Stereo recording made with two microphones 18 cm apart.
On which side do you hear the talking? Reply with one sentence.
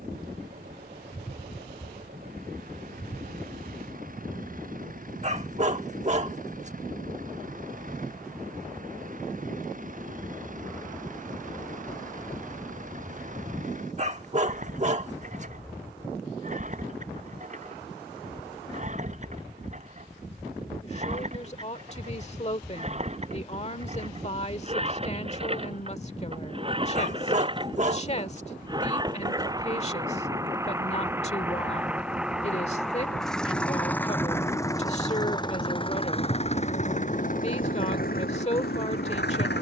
You can hear the talking on the left.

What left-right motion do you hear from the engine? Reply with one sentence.
In this clip you hear the engine move from right to left.